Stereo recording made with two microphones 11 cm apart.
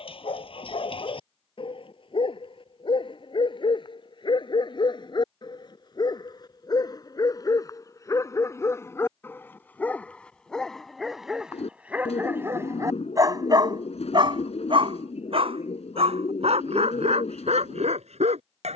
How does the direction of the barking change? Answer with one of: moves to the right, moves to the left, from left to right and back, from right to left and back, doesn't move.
moves to the right.